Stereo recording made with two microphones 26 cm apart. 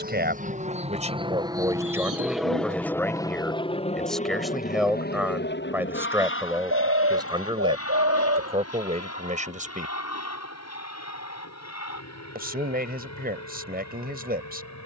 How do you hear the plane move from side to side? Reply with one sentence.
In this clip you hear the plane travel towards the left.